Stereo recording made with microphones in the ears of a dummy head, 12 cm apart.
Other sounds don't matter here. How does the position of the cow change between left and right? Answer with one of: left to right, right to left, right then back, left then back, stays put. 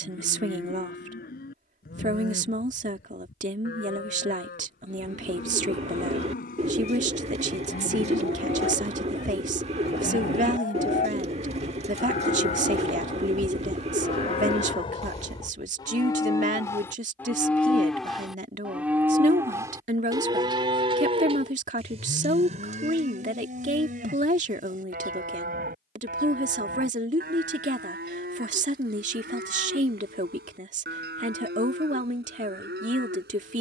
left to right.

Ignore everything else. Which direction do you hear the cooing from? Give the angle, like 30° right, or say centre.
50° right.